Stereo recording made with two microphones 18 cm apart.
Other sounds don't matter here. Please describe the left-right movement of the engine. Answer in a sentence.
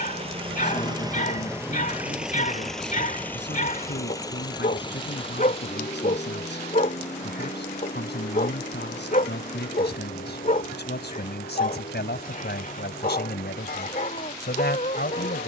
You can hear the engine move from right to left.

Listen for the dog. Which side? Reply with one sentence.
In this clip you hear the dog on the left.